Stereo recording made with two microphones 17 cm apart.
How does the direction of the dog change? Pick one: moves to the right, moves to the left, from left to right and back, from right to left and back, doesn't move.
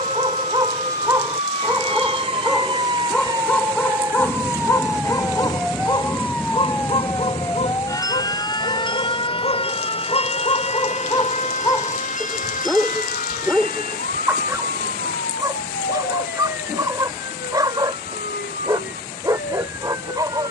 from right to left and back.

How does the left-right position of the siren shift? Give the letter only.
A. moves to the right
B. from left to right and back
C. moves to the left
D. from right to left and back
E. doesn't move
C.